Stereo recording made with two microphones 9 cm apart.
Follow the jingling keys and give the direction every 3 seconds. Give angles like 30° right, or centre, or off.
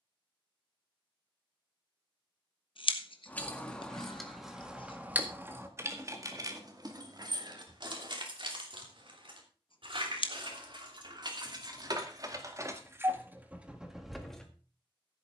off, 10° right, 50° right, 60° right, 20° right.